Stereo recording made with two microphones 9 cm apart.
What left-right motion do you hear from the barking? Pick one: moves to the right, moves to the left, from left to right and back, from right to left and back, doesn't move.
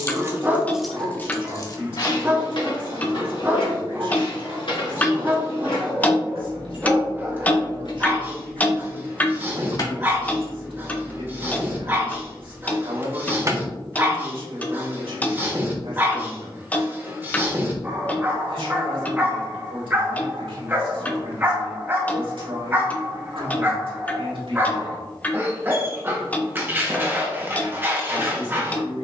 doesn't move.